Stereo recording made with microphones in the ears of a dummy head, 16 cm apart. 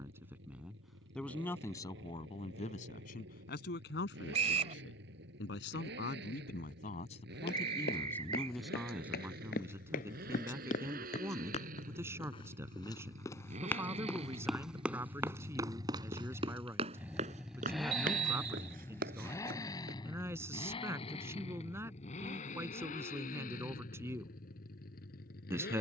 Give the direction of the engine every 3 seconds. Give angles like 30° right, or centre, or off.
70° right, 70° right, 60° right, 60° right, 40° right, 10° right, 20° left, 40° left, 60° left.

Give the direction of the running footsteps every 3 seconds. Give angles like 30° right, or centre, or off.
off, off, 60° left, 50° left, 10° left, 30° right, 50° right, off, off.